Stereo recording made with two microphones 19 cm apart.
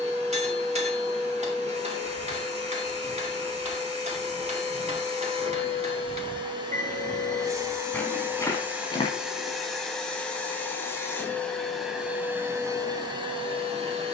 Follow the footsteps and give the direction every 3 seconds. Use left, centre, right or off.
right, right, centre, left, off.